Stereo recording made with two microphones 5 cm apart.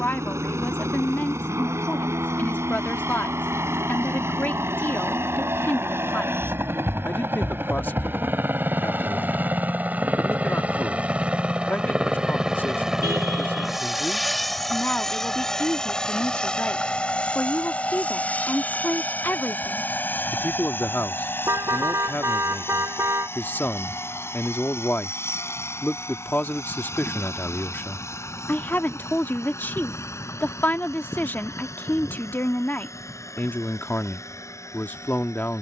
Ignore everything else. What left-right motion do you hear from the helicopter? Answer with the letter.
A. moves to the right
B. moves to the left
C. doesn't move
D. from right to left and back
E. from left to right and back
B.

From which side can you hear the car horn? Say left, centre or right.
right.